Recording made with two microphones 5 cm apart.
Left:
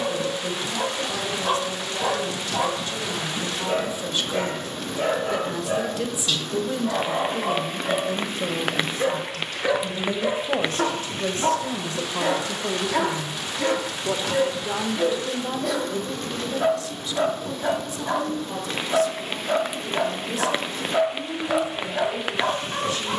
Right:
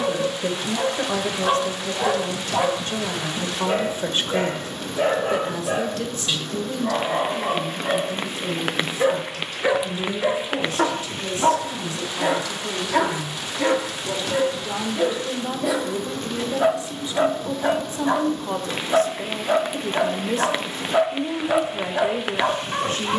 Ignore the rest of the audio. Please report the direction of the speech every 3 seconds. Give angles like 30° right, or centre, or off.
50° right, 30° right, 30° left, 50° left, 30° left, 20° right, 40° right, 40° right.